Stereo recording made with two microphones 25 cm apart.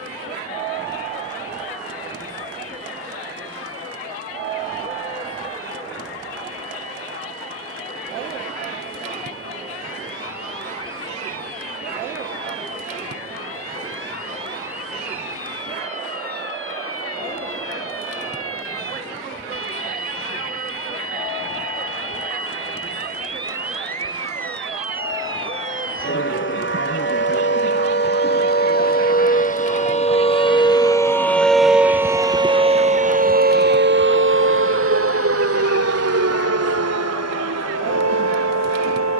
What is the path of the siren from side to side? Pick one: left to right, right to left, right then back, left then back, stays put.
left to right.